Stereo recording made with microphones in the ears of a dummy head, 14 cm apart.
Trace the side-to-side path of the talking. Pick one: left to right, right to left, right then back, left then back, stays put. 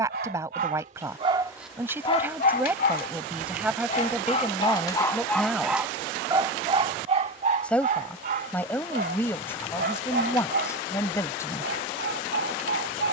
right to left.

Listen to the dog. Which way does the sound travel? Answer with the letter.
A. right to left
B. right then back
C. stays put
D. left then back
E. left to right
D.